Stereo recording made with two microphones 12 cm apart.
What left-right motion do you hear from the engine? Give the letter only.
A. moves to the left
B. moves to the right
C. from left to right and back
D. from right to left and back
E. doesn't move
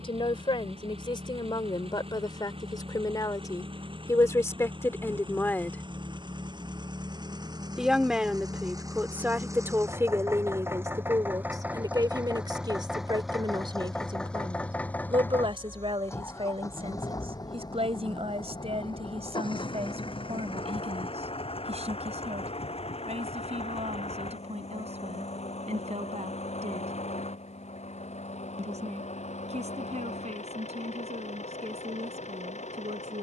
A.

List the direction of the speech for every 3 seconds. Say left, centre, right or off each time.
left, left, centre, right, right, right, right, right, right, right, right.